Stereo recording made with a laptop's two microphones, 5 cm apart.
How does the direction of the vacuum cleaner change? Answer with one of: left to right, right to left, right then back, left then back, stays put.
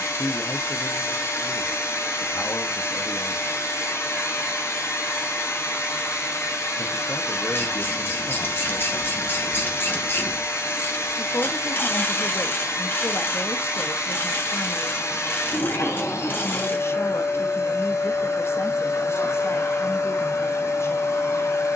stays put.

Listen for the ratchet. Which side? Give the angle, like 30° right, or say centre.
40° left.